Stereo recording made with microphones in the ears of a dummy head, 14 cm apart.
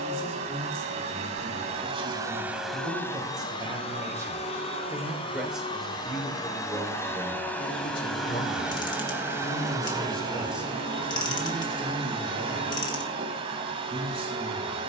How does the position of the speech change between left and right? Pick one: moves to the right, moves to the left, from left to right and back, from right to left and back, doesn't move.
from right to left and back.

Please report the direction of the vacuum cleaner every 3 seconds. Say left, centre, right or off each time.
right, left, centre, right, right.